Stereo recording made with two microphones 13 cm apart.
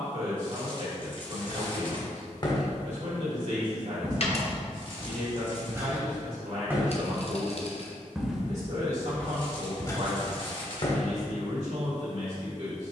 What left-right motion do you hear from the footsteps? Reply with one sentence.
In this clip you hear the footsteps go right and come back.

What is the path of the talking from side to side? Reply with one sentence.
You can hear the talking stay in one place.